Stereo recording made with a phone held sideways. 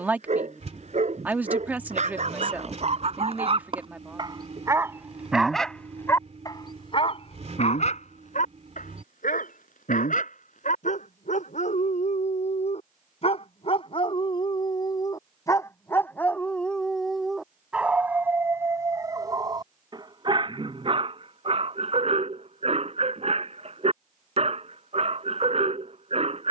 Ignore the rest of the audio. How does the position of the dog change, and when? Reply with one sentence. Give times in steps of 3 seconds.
You can hear the dog on the right from 0 s, on the left from 6 s, in the centre from 15 s and on the right from 18 s.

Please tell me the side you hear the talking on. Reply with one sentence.
In this clip you hear the talking in the centre.